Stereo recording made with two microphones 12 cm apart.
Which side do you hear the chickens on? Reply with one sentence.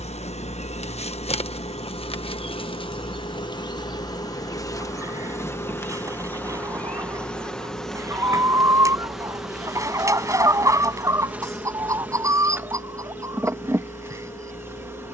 You can hear the chickens on the right.